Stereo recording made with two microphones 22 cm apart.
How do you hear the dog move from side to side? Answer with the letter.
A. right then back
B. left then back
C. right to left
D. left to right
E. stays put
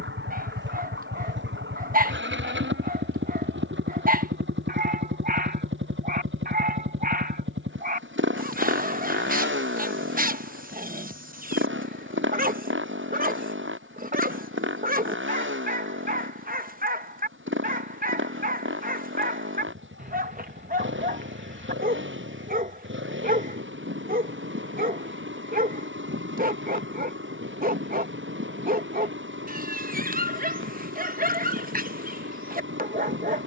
E.